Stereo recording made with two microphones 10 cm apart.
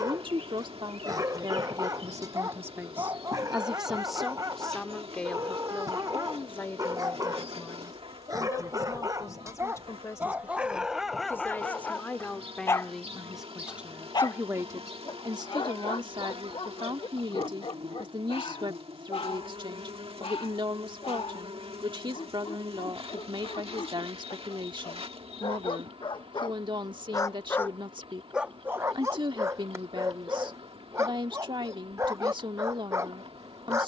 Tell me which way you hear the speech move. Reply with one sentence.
You can hear the speech go left and come back.